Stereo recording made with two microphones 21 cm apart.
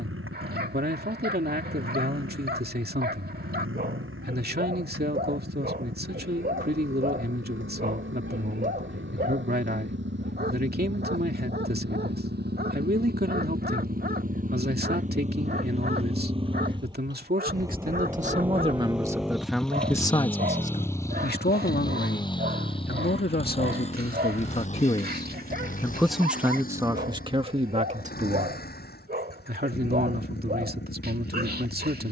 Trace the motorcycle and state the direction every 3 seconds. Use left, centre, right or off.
right, right, right, right, right, right, centre, left, left, left, left.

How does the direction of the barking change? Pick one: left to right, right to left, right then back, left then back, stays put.
stays put.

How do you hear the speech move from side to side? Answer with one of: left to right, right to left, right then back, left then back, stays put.
left then back.